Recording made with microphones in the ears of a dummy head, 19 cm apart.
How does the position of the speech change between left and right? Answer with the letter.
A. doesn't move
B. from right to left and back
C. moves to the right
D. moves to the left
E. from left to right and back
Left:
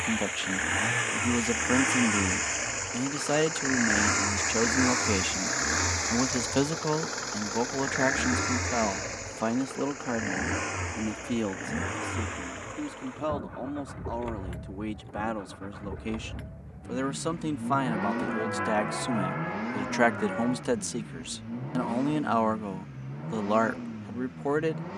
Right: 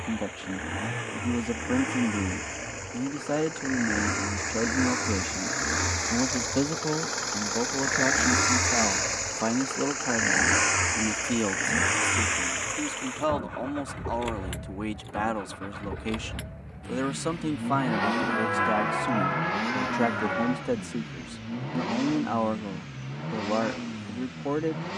E.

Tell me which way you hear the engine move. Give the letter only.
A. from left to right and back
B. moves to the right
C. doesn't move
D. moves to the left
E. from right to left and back
B.